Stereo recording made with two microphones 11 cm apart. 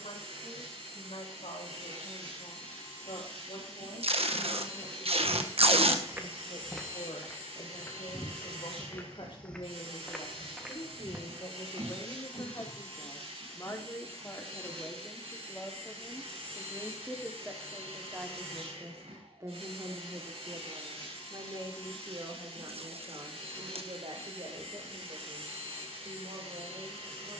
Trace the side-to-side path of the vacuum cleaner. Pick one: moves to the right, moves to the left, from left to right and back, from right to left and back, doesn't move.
doesn't move.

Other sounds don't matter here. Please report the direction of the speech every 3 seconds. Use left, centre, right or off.
left, left, left, left, left, centre, right, right, right.